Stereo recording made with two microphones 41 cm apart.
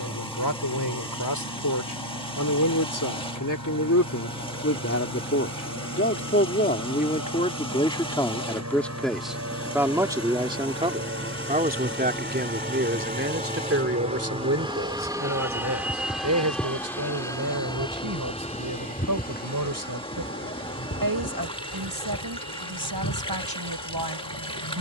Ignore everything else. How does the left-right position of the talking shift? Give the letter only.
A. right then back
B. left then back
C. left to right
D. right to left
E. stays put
C.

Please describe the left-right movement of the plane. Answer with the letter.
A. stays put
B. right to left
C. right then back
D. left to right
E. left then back
B.